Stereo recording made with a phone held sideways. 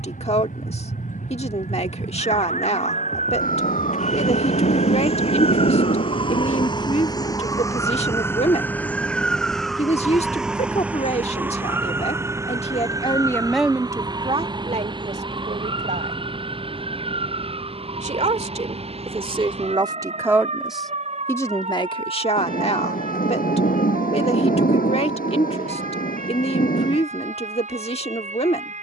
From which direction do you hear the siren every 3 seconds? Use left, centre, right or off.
left, left, left, centre, right, right, right, right, right, right.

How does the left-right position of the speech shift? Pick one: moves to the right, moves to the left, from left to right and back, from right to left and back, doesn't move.
from left to right and back.